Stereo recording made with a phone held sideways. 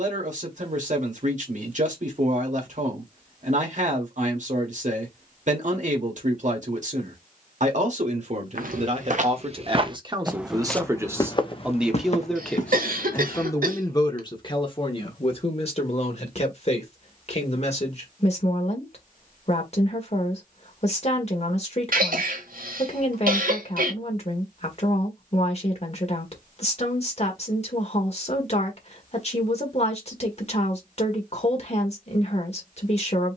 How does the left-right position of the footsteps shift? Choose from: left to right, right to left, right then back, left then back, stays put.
right to left.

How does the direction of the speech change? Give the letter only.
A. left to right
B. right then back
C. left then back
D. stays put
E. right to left
E.